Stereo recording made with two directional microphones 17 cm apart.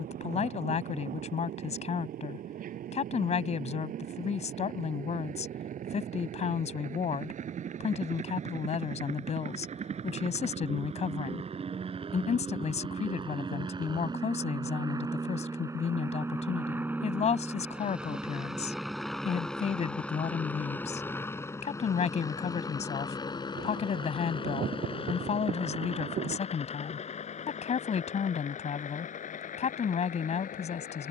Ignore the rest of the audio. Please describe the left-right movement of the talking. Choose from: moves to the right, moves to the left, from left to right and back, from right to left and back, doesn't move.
doesn't move.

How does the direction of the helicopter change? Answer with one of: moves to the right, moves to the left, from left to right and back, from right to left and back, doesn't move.
moves to the left.